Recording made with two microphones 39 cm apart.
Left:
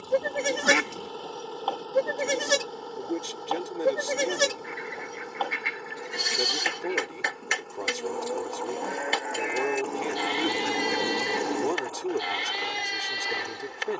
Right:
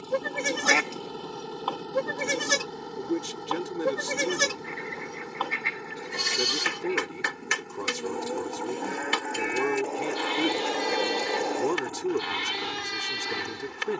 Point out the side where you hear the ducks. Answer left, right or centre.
left.